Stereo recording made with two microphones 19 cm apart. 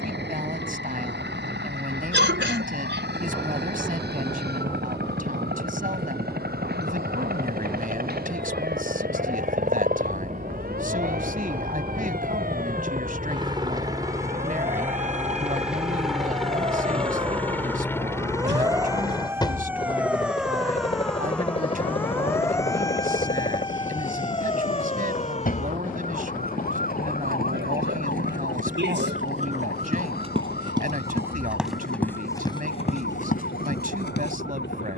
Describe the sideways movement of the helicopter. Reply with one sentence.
In this clip you hear the helicopter move to the left.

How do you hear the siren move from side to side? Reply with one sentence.
In this clip you hear the siren travel towards the left.